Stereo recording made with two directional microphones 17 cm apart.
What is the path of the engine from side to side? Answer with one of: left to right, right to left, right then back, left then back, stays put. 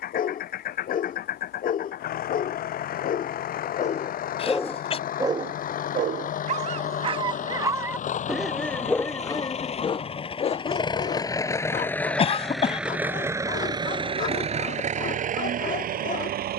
left to right.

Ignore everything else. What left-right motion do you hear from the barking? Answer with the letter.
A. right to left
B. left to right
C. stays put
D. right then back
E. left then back
D.